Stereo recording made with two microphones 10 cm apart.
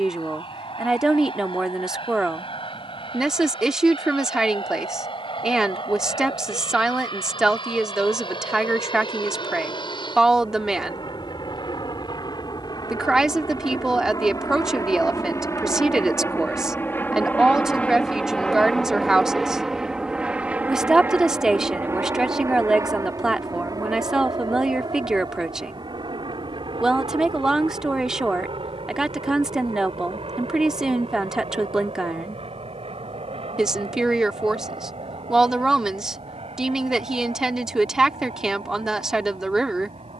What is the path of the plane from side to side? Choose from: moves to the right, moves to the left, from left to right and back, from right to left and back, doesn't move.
moves to the right.